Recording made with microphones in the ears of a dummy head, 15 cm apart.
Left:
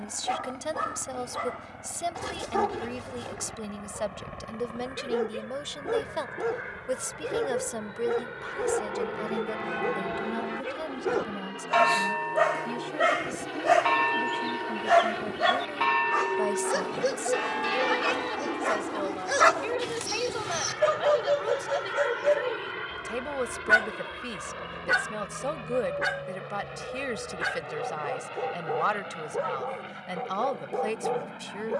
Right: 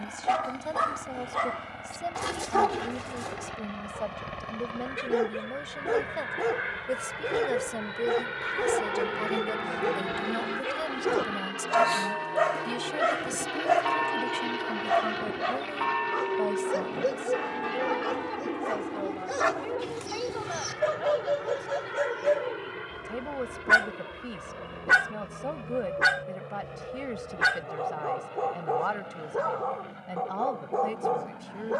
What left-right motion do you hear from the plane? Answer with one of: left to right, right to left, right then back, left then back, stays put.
right to left.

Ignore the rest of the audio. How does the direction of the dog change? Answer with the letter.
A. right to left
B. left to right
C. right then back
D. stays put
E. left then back
E.